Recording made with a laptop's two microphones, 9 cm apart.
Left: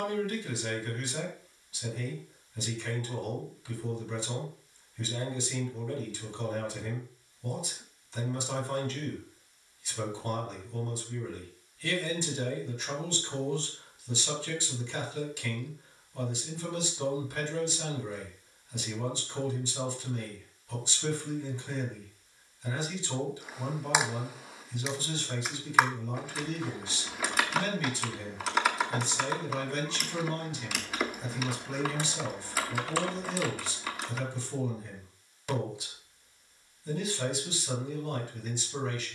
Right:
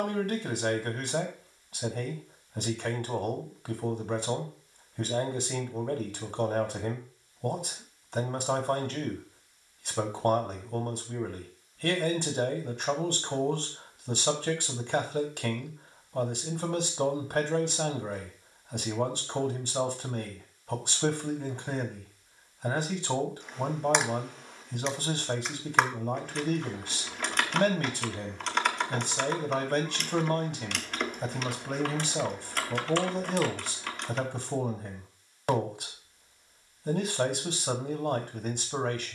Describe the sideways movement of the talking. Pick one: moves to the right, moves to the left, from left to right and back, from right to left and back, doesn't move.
doesn't move.